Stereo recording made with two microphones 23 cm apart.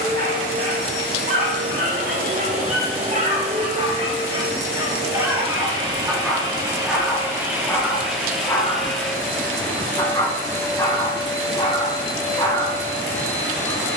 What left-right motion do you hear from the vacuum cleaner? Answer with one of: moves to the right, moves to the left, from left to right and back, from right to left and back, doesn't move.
moves to the left.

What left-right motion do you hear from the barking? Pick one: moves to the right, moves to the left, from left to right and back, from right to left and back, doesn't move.
moves to the left.